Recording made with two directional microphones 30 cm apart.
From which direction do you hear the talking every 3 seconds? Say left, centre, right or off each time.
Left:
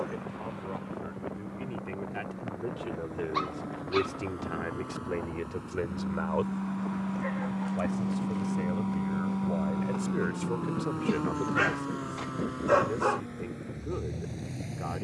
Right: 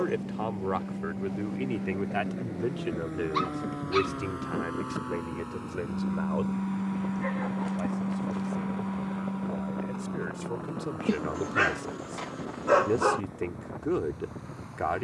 right, centre, left, centre, right.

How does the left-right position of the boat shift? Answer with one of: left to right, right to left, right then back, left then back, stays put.
right to left.